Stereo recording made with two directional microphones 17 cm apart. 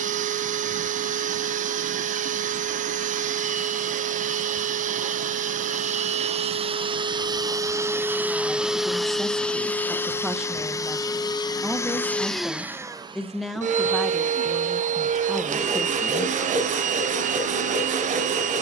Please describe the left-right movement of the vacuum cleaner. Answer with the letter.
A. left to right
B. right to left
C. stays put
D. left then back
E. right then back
D.